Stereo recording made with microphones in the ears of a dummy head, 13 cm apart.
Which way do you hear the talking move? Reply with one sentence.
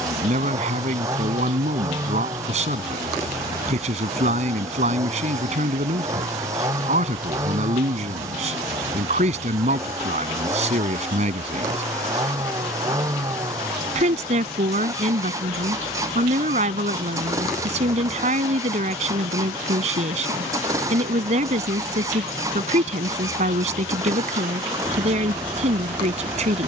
In this clip you hear the talking stay in one place.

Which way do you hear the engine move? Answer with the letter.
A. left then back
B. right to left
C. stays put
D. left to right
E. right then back
C.